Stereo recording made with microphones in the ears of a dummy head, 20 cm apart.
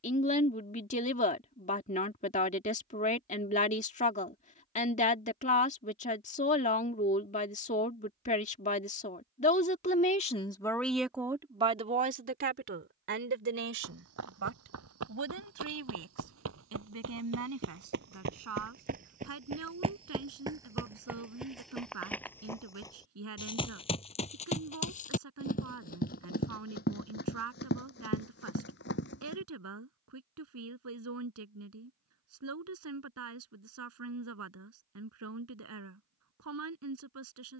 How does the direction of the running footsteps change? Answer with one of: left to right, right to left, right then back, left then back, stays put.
right to left.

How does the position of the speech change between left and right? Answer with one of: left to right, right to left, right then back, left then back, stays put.
left to right.